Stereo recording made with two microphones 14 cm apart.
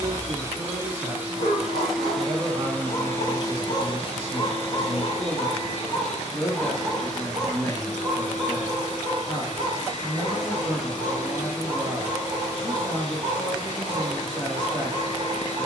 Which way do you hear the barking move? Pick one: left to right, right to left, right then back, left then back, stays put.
left to right.